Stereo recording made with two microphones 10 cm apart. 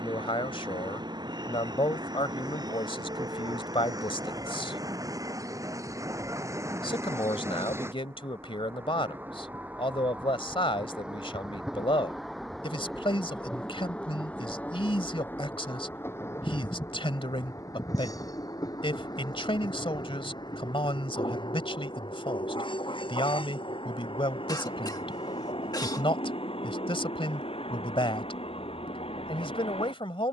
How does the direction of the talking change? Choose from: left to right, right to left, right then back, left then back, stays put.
stays put.